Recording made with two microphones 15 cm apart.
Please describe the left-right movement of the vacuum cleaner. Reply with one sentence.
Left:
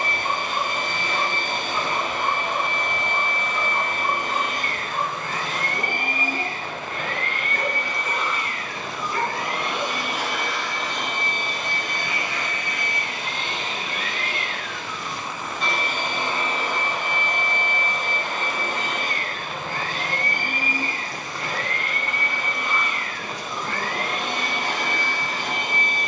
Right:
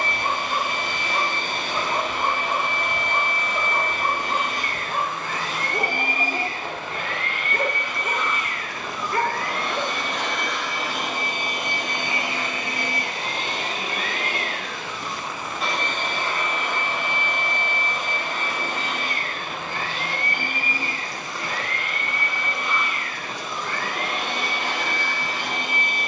In this clip you hear the vacuum cleaner move from left to right and back again.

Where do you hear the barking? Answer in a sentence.
In this clip you hear the barking on the right.